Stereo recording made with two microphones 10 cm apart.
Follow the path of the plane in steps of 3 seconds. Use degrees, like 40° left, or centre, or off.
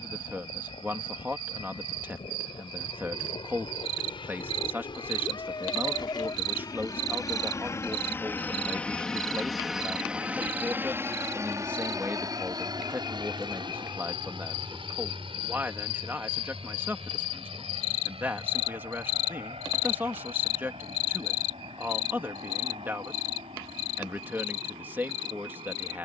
70° left, 60° left, 30° left, 20° right, 50° right, 60° right, 70° right, 70° right, 70° right.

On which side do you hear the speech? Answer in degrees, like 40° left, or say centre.
20° right.